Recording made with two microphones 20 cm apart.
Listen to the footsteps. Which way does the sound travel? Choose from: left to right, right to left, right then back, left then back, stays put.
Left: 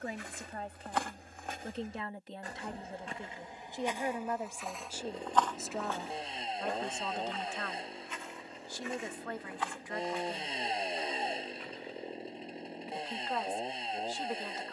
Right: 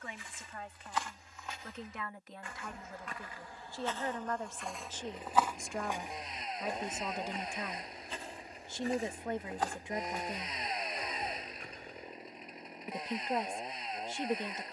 left to right.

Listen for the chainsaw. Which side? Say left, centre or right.
left.